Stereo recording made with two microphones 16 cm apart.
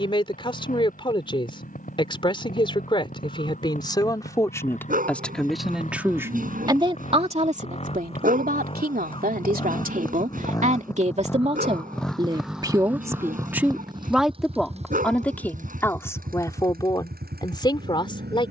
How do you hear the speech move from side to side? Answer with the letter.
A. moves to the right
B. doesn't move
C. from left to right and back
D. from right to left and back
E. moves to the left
C.